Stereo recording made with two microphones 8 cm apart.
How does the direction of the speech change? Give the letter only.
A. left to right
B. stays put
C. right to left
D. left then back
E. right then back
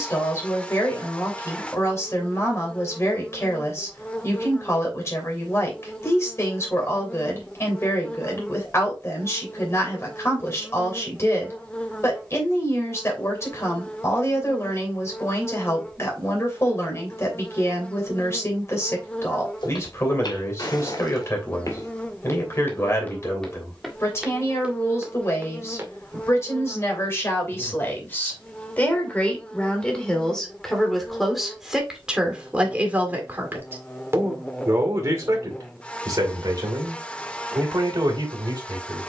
A.